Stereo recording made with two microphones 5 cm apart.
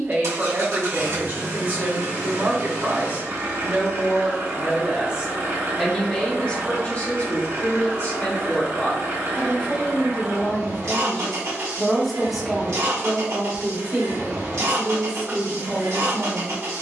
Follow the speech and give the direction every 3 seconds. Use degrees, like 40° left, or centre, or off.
40° right, 30° right, 30° left, 20° left, 20° right, 30° right.